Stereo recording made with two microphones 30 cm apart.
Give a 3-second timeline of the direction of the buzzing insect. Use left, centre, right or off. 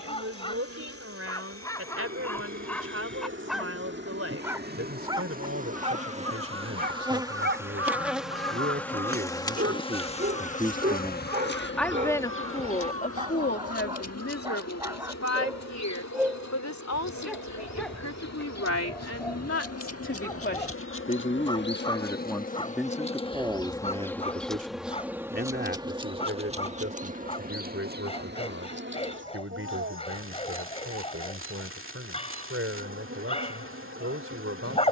right, right, centre, left, left, left, left, left, centre, right, right, right.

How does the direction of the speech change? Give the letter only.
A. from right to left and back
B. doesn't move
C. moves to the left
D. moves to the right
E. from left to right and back
A.